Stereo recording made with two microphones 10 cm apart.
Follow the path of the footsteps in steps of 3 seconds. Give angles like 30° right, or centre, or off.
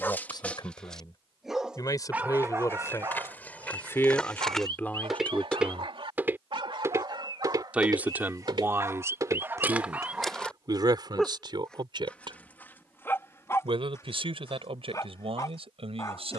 20° left, 10° left, 40° right, 10° right, off, off.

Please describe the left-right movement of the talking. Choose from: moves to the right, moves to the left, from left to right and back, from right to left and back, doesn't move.
moves to the right.